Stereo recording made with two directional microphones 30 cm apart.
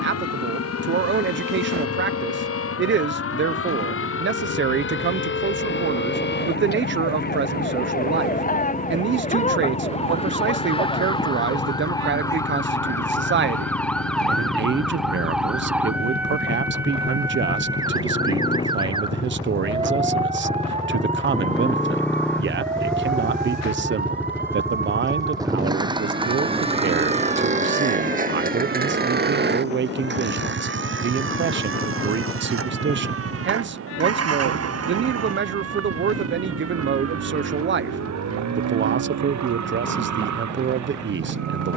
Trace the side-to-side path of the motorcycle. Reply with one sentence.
You can hear the motorcycle move to the right.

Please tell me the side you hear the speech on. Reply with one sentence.
You can hear the speech on the right.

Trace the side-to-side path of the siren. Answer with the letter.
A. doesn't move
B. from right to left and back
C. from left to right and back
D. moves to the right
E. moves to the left
D.